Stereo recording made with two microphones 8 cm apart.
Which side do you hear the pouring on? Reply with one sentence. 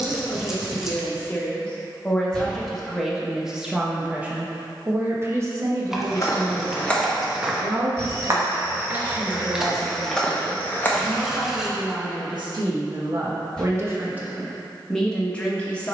You can hear the pouring in the centre.